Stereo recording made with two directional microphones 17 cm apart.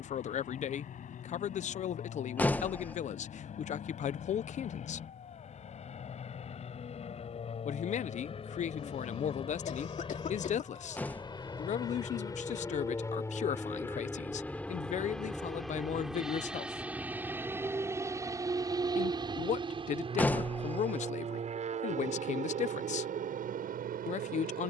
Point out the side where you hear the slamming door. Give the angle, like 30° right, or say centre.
10° left.